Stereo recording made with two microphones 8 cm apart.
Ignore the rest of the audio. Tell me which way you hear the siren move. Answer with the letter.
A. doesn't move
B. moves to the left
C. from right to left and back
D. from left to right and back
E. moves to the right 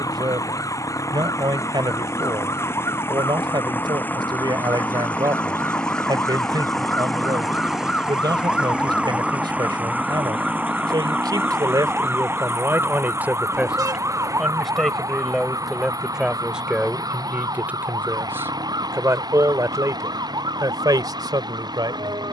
E.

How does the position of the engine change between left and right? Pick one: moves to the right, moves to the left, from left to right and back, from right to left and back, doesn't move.
moves to the right.